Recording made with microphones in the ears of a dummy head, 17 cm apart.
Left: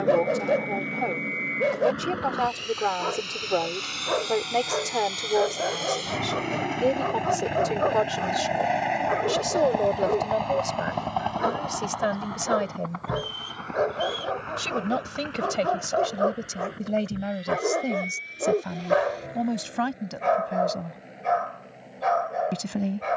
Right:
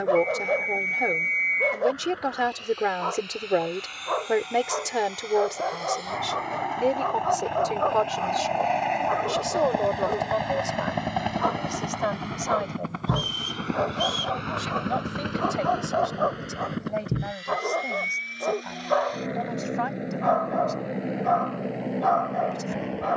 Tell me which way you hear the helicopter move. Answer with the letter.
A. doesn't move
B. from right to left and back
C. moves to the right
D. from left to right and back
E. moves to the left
C.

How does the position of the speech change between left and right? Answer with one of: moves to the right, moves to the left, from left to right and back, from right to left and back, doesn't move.
moves to the left.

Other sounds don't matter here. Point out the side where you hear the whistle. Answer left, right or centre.
right.